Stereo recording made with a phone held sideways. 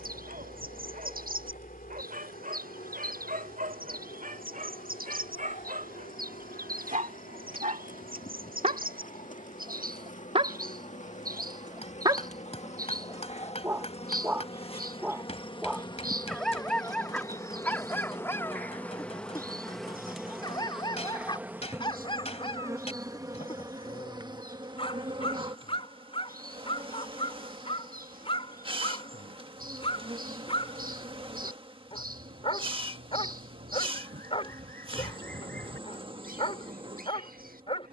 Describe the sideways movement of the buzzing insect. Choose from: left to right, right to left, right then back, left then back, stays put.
left to right.